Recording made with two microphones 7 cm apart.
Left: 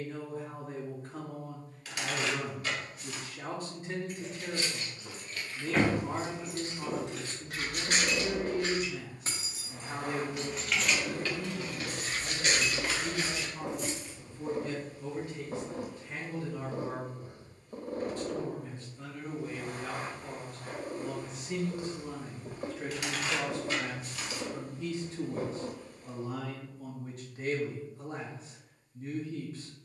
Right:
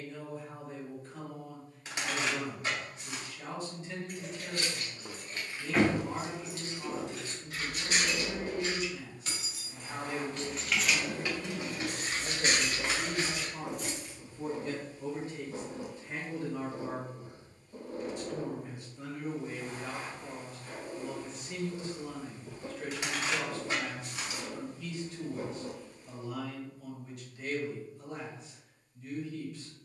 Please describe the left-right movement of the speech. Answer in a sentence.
You can hear the speech move from left to right and back again.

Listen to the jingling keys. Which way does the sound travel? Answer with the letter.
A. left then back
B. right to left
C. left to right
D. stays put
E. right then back
A.